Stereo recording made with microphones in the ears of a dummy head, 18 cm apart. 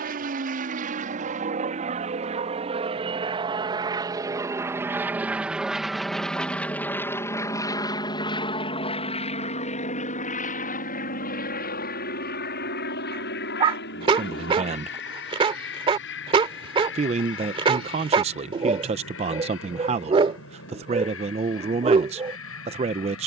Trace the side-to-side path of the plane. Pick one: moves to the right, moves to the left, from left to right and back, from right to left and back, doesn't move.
moves to the left.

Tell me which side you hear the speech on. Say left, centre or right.
right.